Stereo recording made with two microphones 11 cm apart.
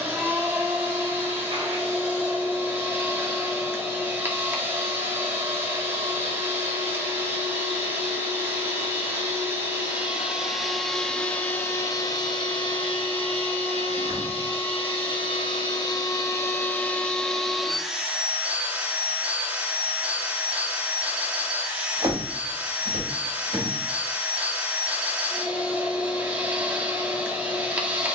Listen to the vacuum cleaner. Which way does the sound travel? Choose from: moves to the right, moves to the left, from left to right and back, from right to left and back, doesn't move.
from right to left and back.